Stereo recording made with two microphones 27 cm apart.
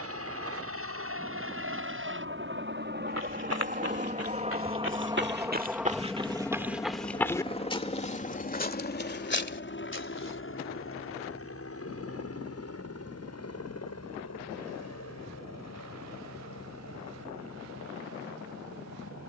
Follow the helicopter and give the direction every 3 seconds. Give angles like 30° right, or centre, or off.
50° right, 20° right, 20° left, 50° left, 60° left, 70° left, 70° left.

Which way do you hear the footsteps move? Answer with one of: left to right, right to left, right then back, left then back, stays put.
right to left.